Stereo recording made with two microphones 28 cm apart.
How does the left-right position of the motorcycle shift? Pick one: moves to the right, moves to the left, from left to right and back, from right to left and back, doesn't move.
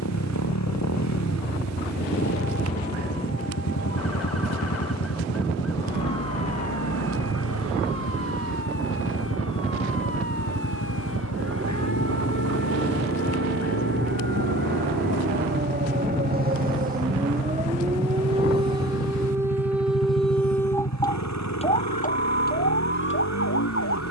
doesn't move.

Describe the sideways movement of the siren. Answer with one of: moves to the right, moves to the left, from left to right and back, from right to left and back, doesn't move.
moves to the left.